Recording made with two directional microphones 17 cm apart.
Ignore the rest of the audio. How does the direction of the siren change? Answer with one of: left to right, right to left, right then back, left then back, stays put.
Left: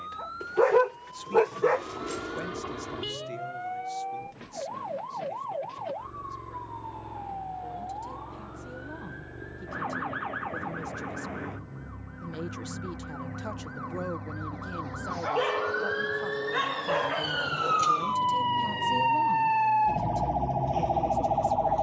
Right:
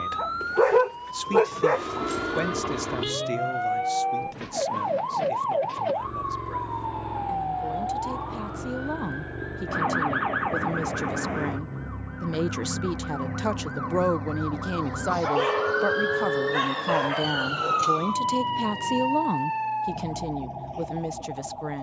right to left.